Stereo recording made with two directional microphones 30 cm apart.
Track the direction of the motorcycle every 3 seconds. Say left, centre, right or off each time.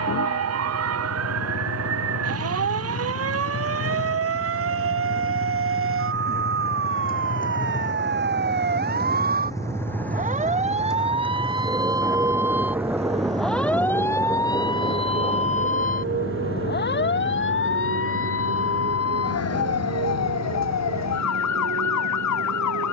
left, left, left, centre, right, right, right, right.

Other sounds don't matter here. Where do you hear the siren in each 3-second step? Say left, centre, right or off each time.
right, right, right, right, centre, left, left, left.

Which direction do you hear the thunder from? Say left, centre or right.
centre.